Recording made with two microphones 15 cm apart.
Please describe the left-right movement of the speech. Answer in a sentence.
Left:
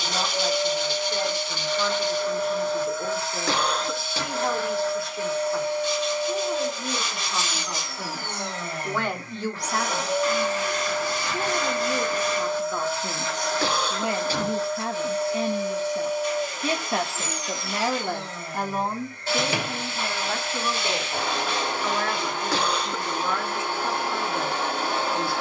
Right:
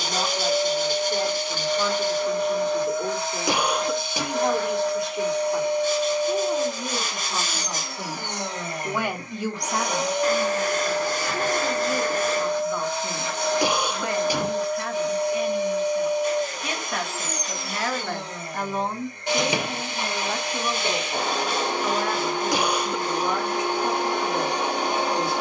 In this clip you hear the speech go left and come back.